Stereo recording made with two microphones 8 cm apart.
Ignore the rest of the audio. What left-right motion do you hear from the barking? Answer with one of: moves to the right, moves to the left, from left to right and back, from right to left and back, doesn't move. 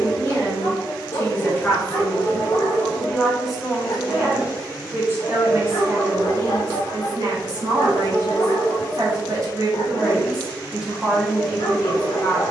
doesn't move.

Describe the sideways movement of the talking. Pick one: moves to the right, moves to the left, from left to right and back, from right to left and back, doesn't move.
from left to right and back.